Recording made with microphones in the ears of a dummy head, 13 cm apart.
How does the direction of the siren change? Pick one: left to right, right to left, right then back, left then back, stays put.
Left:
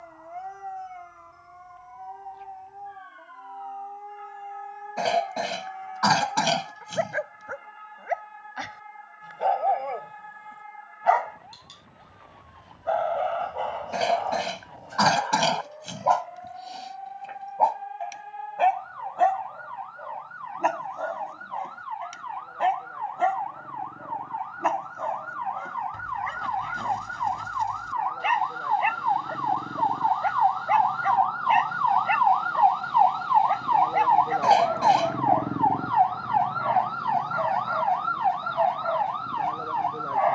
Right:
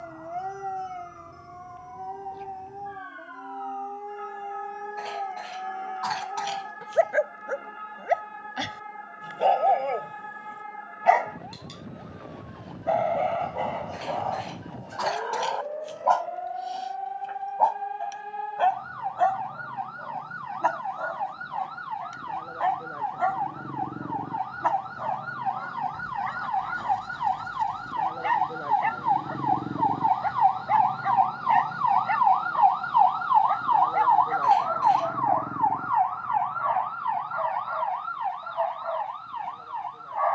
right to left.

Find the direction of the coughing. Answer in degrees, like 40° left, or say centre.
80° left.